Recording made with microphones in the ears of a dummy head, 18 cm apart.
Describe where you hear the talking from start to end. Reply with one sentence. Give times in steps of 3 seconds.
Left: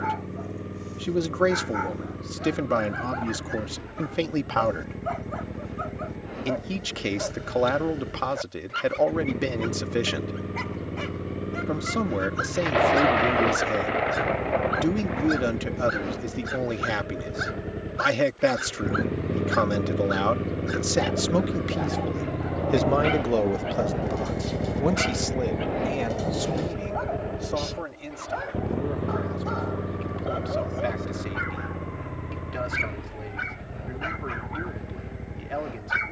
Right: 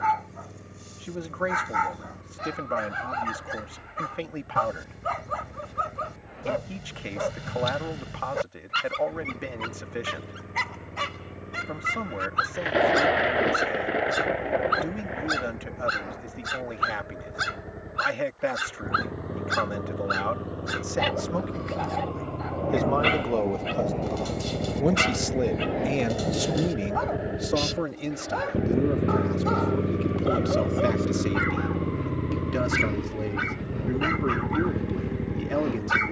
In this clip you hear the talking on the left from 0 s and on the right from 24 s.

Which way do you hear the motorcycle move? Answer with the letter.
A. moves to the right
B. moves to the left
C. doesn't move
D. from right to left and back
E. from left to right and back
A.